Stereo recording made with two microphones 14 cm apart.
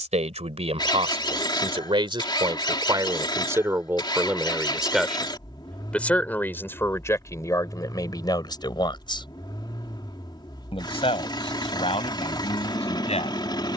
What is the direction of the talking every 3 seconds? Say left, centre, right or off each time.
right, centre, left, left, left.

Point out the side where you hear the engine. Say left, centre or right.
left.